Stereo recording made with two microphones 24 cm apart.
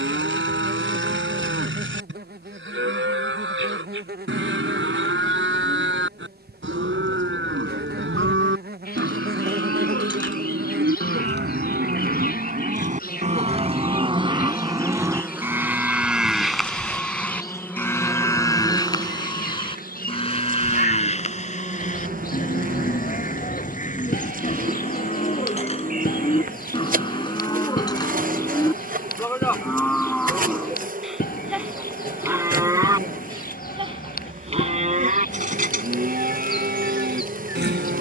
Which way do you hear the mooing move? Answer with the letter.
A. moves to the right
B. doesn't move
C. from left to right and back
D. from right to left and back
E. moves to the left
D.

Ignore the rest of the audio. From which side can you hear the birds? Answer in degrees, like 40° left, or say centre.
40° left.